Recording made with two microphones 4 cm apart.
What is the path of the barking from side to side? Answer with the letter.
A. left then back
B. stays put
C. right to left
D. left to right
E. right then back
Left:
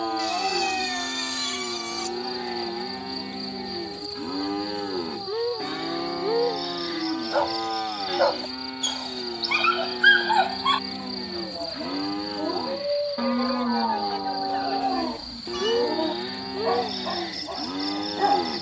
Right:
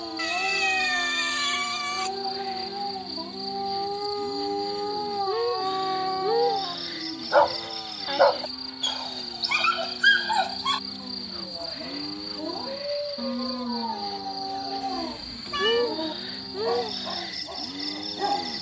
E.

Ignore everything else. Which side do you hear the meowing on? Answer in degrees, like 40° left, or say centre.
30° right.